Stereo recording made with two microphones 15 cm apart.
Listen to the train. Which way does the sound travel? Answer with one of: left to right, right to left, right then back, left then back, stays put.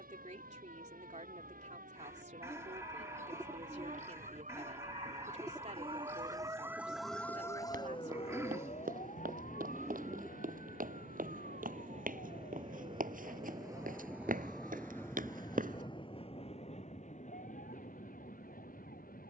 right to left.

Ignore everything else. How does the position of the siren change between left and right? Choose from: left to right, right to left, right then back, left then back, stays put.
right to left.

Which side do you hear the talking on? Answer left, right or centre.
right.